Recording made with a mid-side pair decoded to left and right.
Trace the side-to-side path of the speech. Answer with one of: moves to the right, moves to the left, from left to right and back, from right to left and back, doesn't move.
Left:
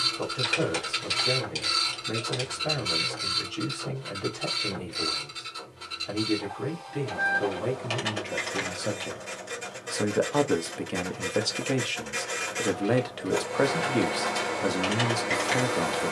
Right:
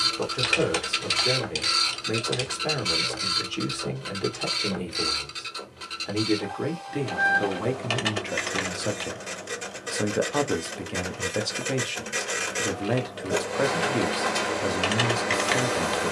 moves to the left.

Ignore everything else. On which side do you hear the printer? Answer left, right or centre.
right.